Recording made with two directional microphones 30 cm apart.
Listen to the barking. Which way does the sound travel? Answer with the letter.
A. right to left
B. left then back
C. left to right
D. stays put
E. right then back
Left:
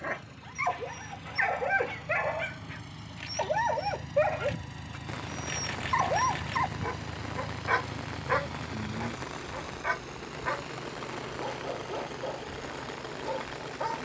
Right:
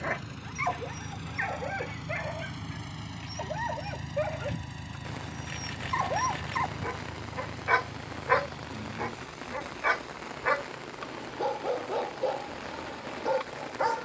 B.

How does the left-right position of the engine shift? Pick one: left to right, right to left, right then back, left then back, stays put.
right to left.